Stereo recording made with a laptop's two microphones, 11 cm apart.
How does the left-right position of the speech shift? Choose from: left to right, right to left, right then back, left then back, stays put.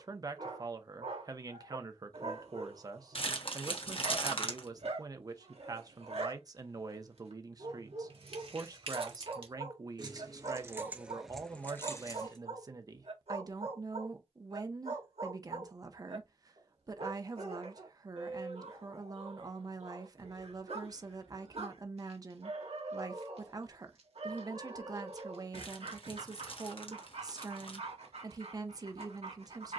stays put.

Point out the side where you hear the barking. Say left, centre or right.
right.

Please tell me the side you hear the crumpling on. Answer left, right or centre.
left.